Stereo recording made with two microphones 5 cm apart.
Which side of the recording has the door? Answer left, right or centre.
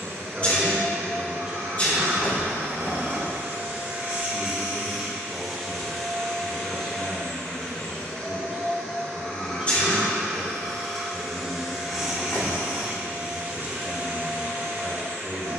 left.